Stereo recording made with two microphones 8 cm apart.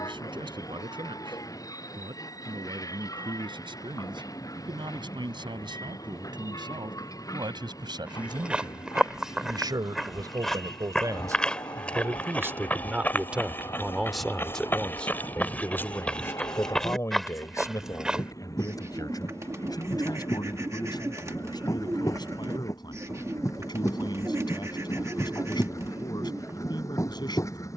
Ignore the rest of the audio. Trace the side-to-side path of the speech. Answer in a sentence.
In this clip you hear the speech travel towards the left.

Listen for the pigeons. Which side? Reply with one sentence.
In this clip you hear the pigeons on the right.